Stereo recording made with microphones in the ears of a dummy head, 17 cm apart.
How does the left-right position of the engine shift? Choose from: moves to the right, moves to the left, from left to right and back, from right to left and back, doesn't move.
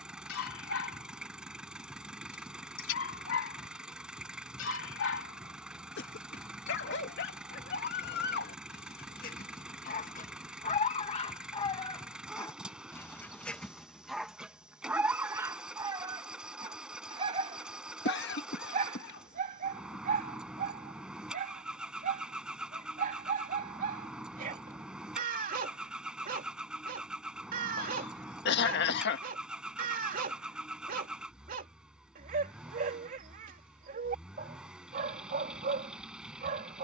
doesn't move.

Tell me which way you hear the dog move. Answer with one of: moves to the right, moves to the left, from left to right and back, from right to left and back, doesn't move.
moves to the right.